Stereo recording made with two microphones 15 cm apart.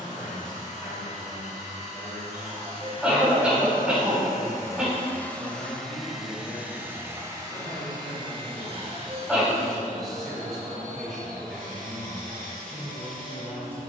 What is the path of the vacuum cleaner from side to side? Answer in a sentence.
In this clip you hear the vacuum cleaner travel towards the right.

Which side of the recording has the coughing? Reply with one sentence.
You can hear the coughing in the centre.